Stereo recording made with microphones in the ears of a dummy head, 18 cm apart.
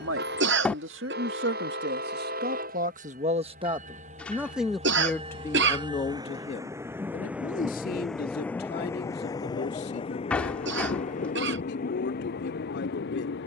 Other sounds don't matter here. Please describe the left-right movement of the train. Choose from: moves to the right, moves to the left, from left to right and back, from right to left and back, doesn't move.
moves to the left.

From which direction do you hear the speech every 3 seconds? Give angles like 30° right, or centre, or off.
60° right, centre, 40° left, 50° left, 60° left.